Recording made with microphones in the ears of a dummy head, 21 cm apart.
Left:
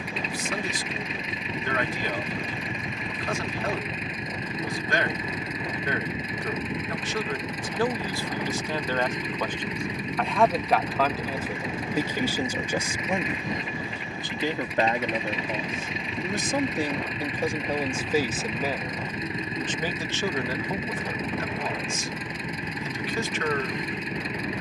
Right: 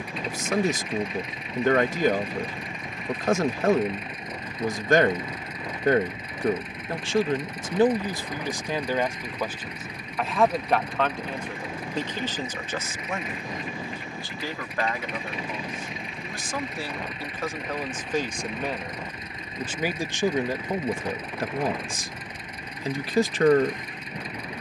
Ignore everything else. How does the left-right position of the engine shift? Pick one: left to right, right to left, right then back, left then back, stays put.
stays put.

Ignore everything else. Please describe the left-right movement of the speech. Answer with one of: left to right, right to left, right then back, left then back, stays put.
left then back.